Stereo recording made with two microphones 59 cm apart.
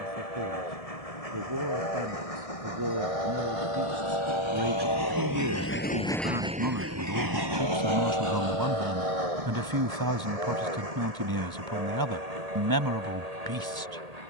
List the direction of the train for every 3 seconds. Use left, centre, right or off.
left, left, right, right, right.